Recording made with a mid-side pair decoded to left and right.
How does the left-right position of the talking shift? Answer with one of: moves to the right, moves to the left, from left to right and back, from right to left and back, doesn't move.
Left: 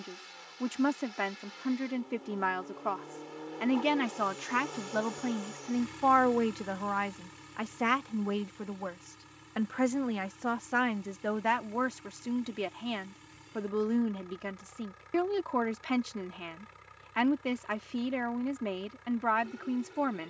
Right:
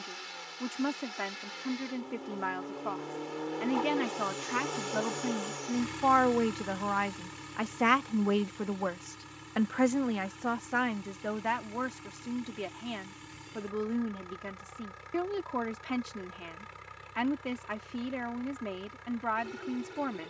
from left to right and back.